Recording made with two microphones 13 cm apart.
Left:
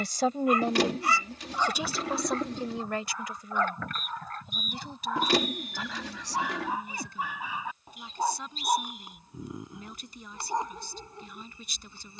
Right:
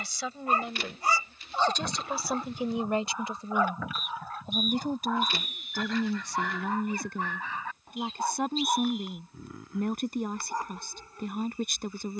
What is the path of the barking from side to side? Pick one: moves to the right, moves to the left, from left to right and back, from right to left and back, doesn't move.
moves to the left.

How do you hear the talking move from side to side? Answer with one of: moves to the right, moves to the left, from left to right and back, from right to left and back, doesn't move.
moves to the right.